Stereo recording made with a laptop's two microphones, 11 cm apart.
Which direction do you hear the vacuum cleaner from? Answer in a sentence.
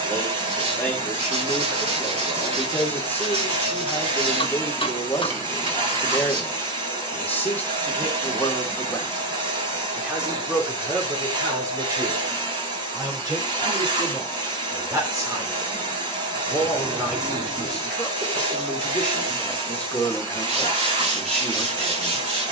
In this clip you hear the vacuum cleaner on the right.